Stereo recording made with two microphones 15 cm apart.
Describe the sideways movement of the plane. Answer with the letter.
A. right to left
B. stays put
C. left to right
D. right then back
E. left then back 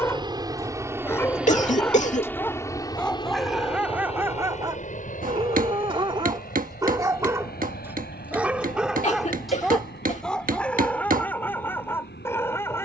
A.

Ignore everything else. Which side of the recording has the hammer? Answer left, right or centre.
right.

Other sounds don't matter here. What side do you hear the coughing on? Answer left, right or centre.
left.